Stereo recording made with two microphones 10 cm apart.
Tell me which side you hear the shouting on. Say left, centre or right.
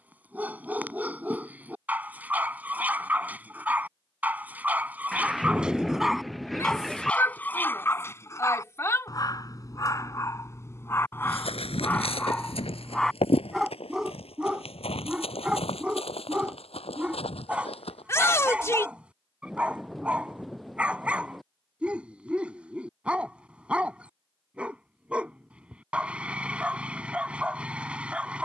left.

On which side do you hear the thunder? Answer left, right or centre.
centre.